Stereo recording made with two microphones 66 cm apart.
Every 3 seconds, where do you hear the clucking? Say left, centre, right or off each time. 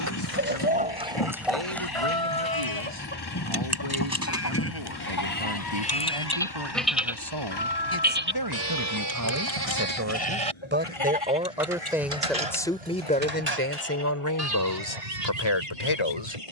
centre, left, left, left, left, left.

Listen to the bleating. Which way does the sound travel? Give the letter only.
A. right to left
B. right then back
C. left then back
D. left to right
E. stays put
D.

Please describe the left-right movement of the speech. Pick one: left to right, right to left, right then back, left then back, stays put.
right to left.